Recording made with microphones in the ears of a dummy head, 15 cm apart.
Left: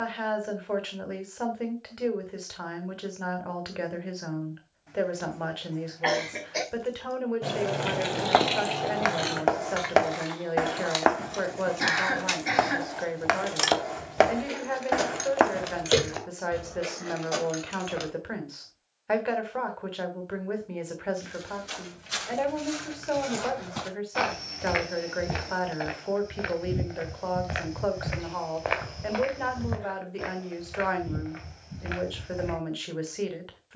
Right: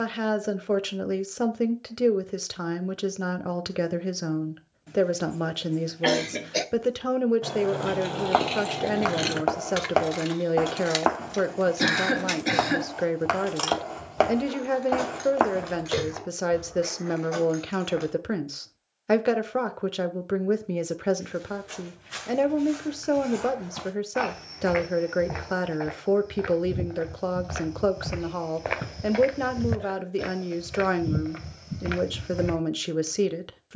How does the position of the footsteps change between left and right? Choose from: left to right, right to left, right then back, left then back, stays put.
left to right.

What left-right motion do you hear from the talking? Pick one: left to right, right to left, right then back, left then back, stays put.
stays put.